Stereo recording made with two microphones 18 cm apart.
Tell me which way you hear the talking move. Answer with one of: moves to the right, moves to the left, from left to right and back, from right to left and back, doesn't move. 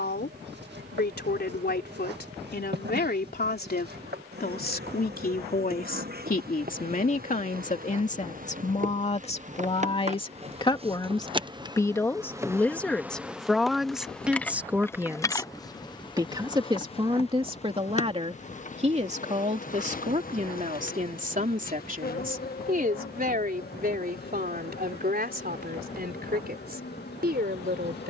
moves to the right.